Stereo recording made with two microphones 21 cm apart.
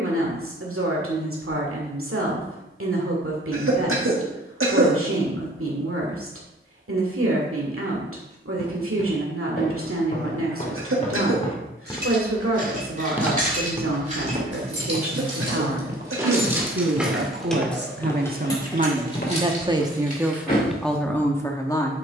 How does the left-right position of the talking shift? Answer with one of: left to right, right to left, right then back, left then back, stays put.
right to left.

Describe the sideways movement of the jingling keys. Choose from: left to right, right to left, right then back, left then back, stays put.
right to left.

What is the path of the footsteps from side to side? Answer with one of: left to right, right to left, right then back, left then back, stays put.
right then back.